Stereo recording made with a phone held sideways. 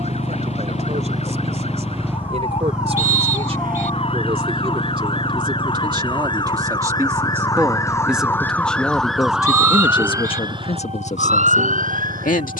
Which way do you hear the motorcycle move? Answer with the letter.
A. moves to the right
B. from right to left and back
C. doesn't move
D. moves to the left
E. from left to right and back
D.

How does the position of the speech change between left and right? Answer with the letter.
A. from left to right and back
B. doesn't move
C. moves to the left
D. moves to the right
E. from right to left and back
C.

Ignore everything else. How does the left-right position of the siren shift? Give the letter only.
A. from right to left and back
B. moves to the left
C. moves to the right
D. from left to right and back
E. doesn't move
C.